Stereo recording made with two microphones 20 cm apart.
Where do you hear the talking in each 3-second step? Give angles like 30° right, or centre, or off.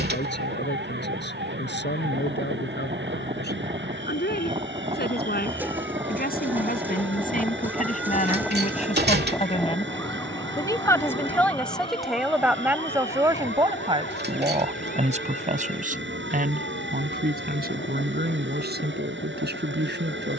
70° left, 60° left, 50° left, 20° left, 20° right, 50° right, 60° right.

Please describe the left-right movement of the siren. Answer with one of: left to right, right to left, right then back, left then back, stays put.
right to left.